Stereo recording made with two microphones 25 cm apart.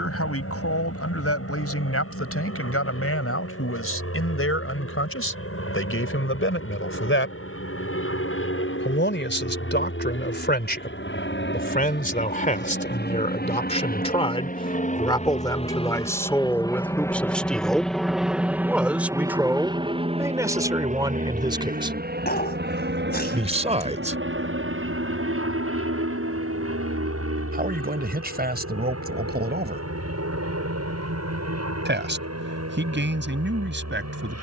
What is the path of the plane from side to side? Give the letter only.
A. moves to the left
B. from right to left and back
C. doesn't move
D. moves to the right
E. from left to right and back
D.